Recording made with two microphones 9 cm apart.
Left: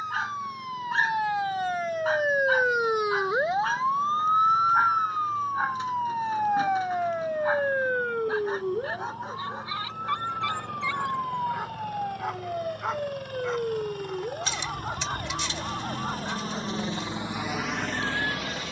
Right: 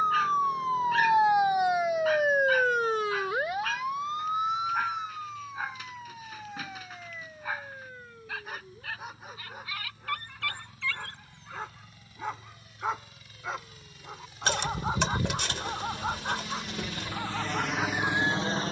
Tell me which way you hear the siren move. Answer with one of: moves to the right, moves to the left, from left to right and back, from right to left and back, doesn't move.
moves to the left.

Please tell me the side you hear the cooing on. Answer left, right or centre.
right.